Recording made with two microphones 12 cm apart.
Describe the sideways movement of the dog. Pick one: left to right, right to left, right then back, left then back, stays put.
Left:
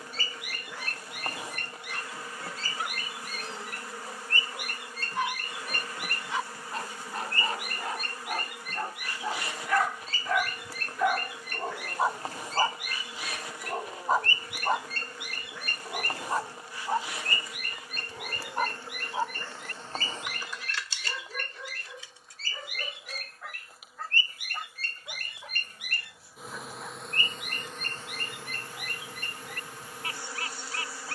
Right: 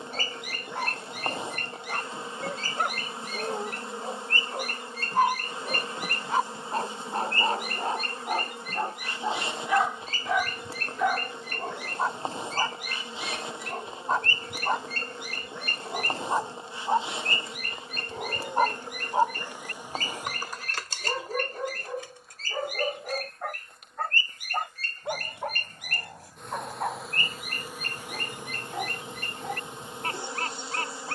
left then back.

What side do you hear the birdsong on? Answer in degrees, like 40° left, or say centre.
40° right.